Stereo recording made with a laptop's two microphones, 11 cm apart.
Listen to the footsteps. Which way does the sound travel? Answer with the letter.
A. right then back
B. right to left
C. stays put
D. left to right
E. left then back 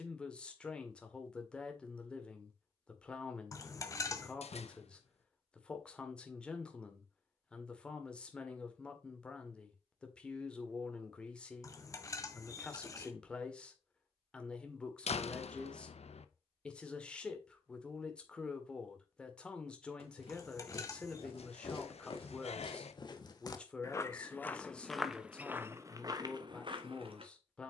D.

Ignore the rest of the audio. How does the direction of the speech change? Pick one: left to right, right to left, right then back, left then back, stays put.
stays put.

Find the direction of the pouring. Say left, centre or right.
left.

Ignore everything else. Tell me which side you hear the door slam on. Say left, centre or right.
left.